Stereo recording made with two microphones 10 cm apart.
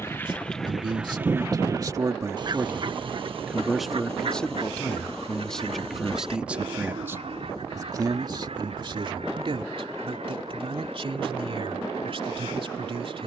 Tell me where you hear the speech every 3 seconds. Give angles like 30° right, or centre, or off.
40° right, centre, 30° right, 60° right, 60° right.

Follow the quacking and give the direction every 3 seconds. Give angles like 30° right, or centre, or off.
20° right, 70° right, 80° right, 80° right, 80° right.